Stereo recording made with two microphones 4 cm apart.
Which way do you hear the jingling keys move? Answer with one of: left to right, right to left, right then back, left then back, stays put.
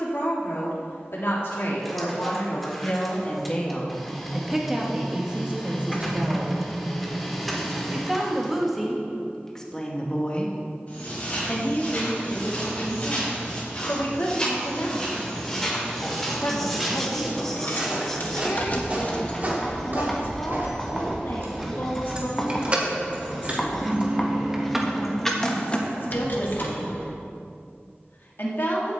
right then back.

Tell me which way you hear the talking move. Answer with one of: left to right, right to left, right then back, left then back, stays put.
right then back.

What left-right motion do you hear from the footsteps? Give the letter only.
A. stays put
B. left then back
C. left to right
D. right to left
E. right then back
C.